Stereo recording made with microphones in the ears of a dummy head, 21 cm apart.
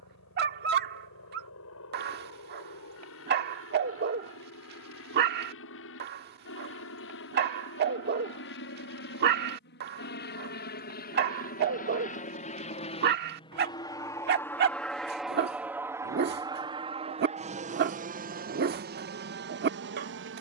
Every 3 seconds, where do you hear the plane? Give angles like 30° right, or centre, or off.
70° left, 70° left, 60° left, 50° left, 20° left, 20° right, 40° right.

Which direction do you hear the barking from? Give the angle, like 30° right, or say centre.
40° right.